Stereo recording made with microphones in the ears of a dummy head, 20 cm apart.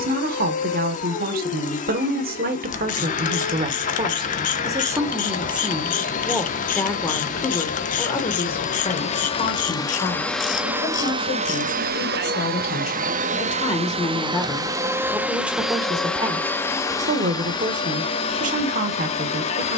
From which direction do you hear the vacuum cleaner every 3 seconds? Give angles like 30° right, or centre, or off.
30° left, 30° left, 30° left, centre, 30° right, 10° left, 30° left.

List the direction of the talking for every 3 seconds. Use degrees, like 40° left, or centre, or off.
40° right, 20° right, 20° left, 40° left, 20° left, 20° right, 40° right.